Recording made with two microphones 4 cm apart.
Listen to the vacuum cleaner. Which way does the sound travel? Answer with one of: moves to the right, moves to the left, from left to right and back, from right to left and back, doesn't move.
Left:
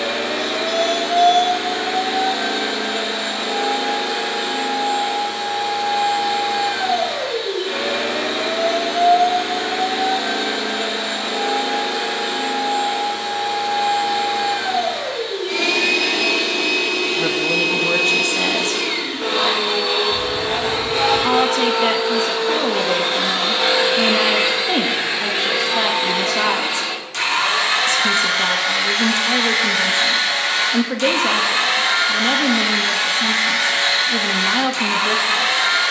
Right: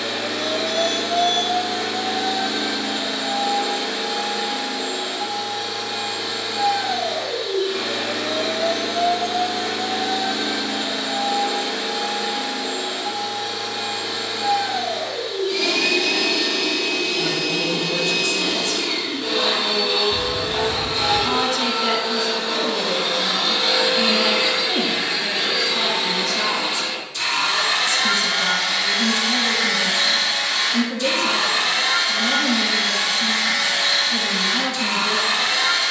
doesn't move.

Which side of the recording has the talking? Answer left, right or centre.
left.